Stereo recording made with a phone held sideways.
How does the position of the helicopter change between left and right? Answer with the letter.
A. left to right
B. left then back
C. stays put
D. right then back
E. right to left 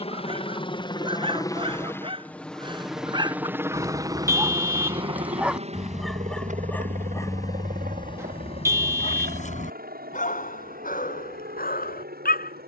A.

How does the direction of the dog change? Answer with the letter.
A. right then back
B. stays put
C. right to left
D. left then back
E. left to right
C.